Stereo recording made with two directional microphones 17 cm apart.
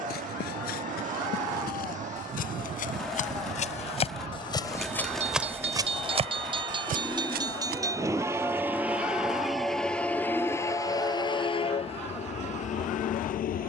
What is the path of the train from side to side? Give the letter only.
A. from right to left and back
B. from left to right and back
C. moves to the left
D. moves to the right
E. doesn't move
C.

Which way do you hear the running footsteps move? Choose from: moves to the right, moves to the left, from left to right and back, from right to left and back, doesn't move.
moves to the right.